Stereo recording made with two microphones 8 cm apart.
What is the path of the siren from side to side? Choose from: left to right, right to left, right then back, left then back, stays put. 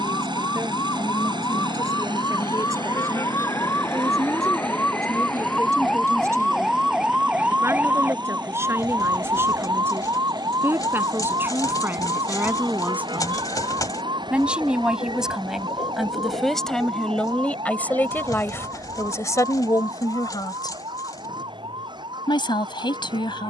left to right.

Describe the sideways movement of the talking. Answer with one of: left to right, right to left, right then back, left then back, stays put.
right to left.